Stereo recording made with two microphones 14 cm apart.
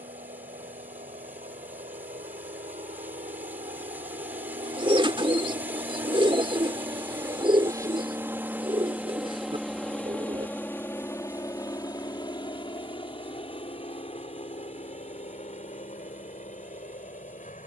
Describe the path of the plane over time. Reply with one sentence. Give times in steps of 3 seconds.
You can hear the plane on the right from 0 s, in the centre from 9 s and on the left from 12 s.